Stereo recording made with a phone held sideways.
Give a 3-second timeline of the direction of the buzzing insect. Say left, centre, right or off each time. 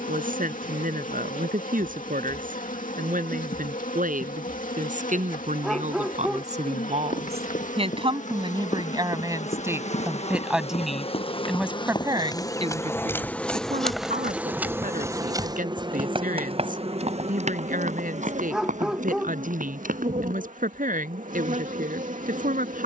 left, left, left, left, centre, right, right, right.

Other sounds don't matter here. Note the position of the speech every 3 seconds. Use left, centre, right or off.
right, right, right, centre, right, right, right, right.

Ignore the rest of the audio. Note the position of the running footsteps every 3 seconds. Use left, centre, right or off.
off, off, left, left, centre, right, right, off.